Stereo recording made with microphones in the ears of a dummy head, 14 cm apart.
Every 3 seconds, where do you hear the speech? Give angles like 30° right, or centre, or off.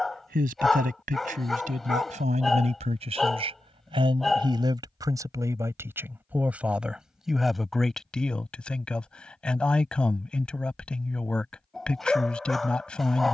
50° right, 30° right, centre, 10° left, 10° left.